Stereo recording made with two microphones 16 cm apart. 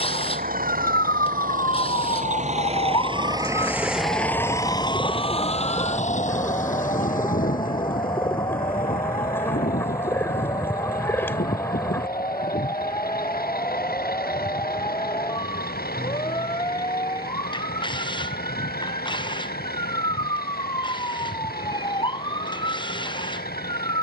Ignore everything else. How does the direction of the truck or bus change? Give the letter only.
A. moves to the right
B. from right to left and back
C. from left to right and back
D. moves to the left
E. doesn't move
D.